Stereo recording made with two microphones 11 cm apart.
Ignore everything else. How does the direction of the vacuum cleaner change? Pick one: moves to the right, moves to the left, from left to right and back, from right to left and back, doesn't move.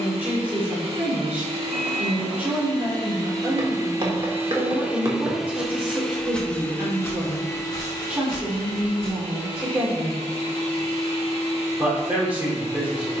moves to the left.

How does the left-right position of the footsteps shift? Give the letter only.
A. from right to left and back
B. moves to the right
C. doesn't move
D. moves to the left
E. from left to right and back
D.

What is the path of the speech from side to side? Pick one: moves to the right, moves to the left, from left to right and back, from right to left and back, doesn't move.
doesn't move.